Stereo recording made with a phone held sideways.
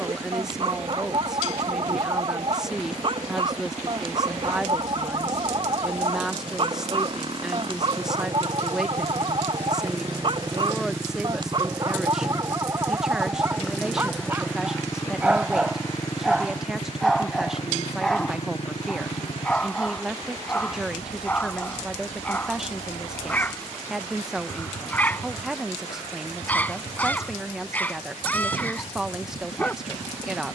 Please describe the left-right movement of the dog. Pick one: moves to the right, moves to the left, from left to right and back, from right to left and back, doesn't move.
moves to the left.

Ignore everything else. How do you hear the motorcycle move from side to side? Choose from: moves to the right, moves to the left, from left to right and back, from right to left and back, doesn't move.
moves to the left.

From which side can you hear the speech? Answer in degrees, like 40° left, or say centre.
centre.